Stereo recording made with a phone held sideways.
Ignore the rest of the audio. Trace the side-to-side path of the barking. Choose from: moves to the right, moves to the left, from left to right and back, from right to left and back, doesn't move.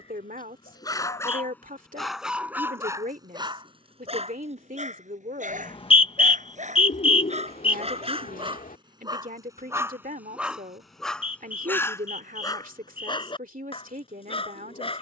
from left to right and back.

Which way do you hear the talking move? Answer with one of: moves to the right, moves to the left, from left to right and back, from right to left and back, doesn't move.
doesn't move.